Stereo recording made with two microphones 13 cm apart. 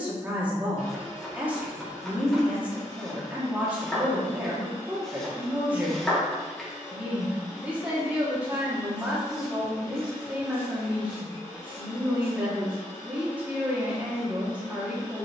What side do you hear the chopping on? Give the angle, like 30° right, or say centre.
centre.